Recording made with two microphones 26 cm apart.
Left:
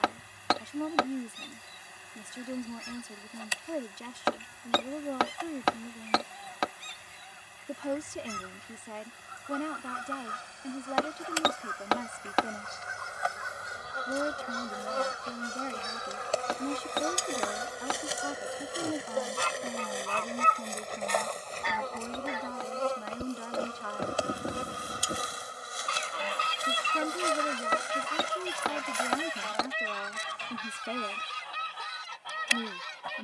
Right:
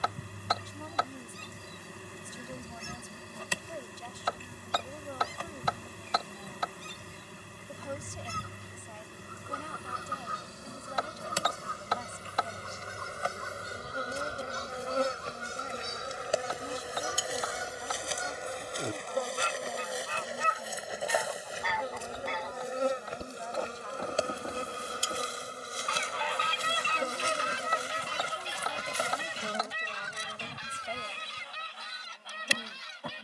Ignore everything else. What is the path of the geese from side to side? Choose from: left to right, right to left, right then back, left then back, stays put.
right to left.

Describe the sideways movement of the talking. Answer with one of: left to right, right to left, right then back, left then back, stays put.
stays put.